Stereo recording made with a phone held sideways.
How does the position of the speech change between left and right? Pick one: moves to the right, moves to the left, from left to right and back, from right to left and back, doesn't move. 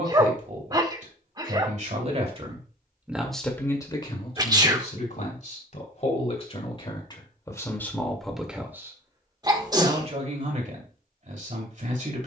from right to left and back.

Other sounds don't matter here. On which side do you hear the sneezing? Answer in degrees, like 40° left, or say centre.
30° right.